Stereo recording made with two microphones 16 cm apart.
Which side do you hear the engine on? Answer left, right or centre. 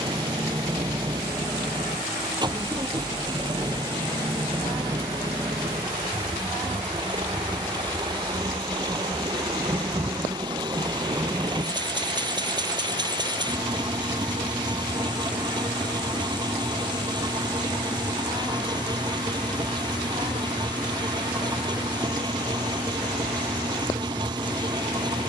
right.